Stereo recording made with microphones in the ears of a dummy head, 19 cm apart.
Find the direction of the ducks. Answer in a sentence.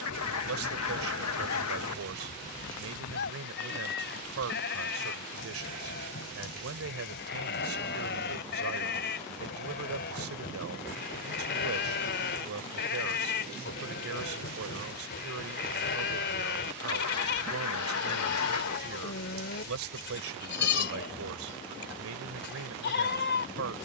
In this clip you hear the ducks on the left.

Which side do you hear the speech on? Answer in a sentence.
In this clip you hear the speech on the right.